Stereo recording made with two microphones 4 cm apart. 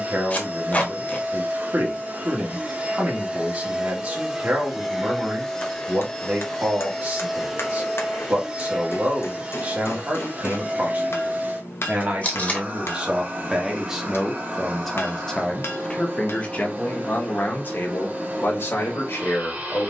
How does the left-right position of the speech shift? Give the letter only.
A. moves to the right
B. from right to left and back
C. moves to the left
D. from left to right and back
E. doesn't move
C.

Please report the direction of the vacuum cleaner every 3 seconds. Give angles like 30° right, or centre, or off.
40° right, 10° right, centre, 30° right, 40° right, 40° right, 40° right.